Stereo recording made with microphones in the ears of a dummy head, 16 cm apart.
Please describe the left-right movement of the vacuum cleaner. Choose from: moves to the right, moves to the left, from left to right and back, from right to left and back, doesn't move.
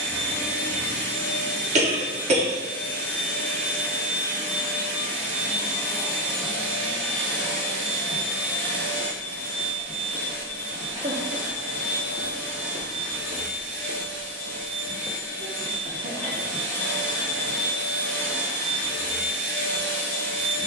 doesn't move.